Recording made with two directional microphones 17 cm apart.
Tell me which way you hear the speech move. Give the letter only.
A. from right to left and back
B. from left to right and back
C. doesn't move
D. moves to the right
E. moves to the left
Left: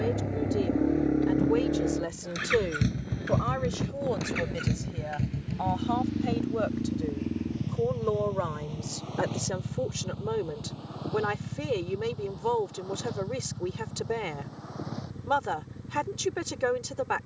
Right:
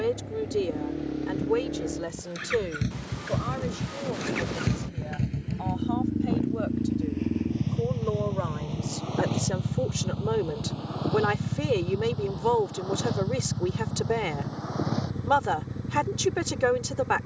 A.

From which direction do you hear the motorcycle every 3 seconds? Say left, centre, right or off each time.
left, centre, right, right, right, right.